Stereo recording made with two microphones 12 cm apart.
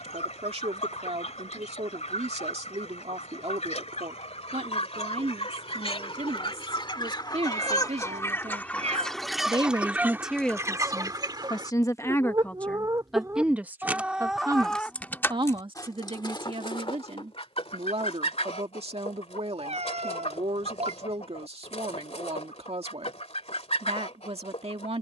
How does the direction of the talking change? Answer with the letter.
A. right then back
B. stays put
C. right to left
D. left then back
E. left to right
D.